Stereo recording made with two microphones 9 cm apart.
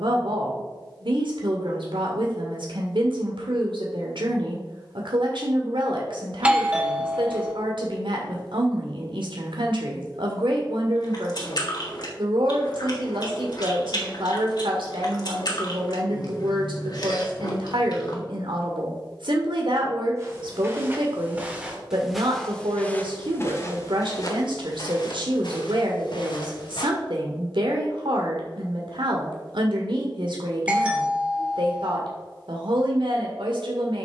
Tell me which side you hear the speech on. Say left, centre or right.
right.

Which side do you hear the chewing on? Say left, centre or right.
left.